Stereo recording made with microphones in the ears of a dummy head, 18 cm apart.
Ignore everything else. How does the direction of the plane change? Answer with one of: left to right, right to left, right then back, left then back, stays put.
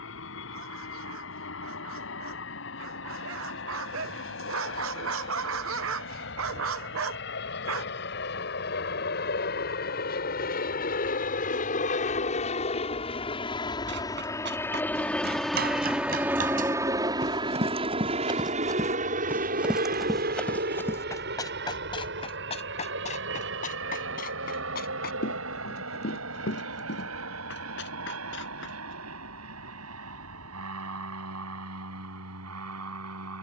left to right.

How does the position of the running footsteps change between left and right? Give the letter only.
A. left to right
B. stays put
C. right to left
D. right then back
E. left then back
C.